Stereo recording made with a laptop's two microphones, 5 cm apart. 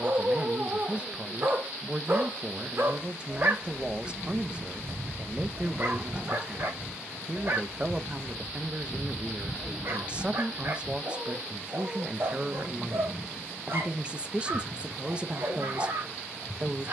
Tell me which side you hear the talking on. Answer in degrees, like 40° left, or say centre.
20° right.